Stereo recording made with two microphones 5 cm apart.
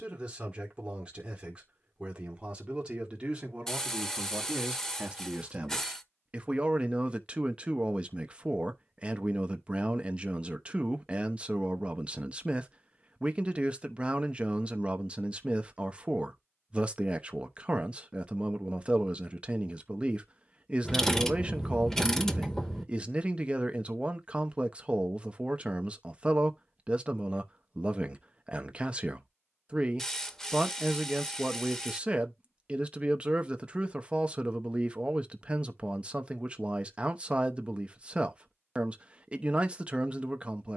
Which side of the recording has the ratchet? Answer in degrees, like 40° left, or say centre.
10° left.